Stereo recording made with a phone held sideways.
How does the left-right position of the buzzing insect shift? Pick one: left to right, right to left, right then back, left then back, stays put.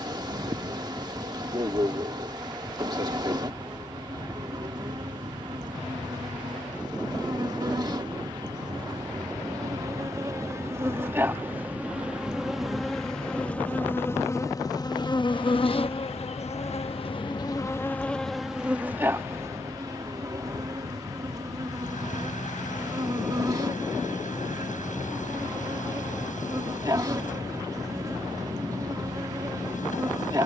left then back.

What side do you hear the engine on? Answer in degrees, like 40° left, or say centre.
80° left.